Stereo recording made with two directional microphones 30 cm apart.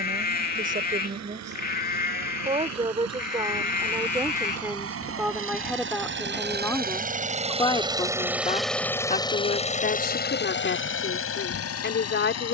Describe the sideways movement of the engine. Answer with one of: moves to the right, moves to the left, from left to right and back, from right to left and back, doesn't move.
moves to the left.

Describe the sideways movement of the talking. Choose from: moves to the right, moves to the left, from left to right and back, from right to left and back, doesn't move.
moves to the left.